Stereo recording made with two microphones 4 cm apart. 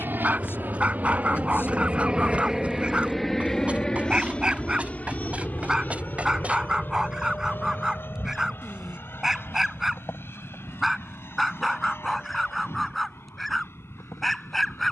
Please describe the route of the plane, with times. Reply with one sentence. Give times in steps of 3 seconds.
In this clip you hear the plane on the right from 0 s and on the left from 3 s.